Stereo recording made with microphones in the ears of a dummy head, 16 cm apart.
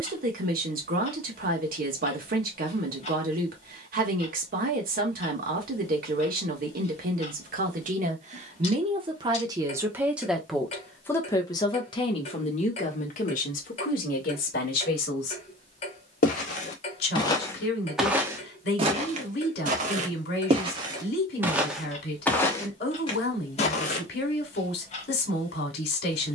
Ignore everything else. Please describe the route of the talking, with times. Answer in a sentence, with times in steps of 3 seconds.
You can hear the talking on the right from 0 s, in the centre from 9 s and on the left from 12 s.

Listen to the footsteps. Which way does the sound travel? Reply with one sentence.
You can hear the footsteps move from left to right and back again.